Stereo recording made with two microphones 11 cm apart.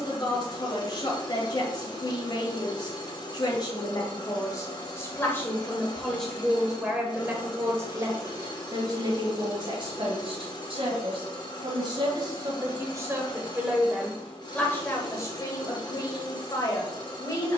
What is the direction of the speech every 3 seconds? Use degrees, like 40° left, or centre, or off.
40° left, 30° left, 20° right, 50° right, 20° right, 30° left.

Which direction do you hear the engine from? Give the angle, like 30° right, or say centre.
40° left.